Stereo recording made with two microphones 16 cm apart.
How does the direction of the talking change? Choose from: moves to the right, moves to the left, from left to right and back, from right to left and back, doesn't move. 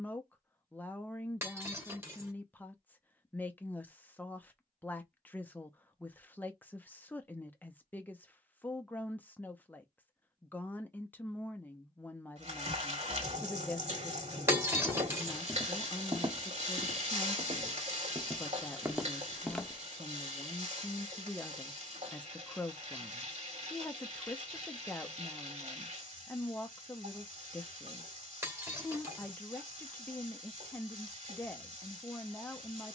doesn't move.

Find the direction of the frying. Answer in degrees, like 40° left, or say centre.
50° right.